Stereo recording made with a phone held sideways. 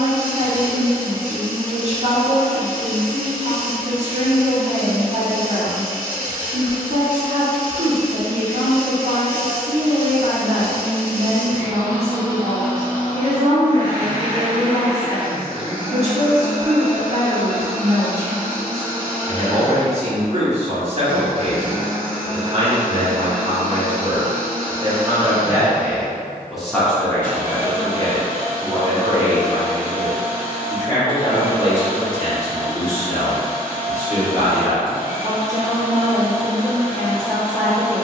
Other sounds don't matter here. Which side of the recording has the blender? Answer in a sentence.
You can hear the blender on the left.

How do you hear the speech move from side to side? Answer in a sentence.
You can hear the speech travel towards the left.